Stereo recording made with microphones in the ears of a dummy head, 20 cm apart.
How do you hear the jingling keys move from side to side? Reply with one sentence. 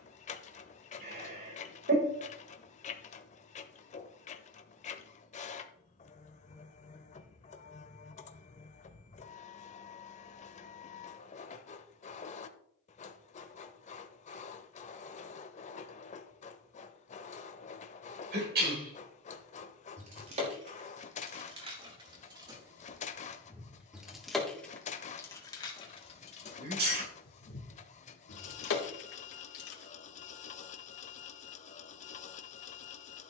In this clip you hear the jingling keys go from the right side to the left.